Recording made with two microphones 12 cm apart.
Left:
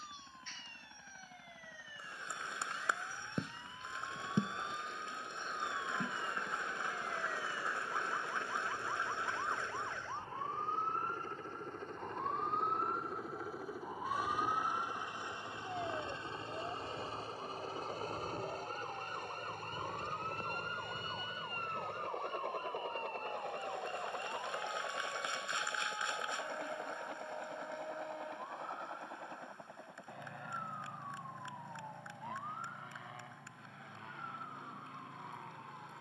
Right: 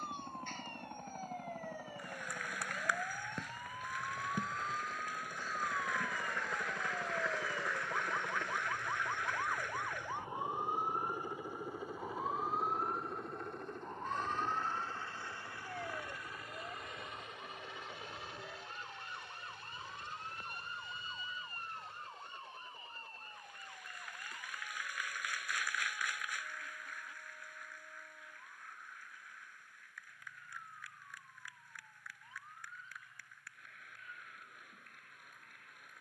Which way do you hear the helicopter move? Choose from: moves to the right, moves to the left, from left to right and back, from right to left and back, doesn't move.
moves to the left.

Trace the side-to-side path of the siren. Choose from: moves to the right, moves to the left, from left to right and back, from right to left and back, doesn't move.
moves to the left.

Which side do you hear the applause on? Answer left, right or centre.
left.